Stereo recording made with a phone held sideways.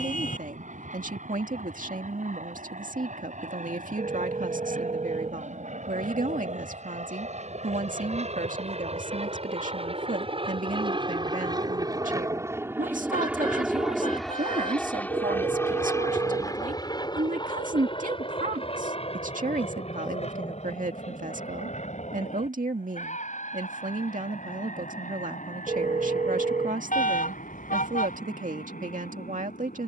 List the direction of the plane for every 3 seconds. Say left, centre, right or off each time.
right, right, right, right, centre, left, left, left, left, left.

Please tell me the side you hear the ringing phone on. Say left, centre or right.
right.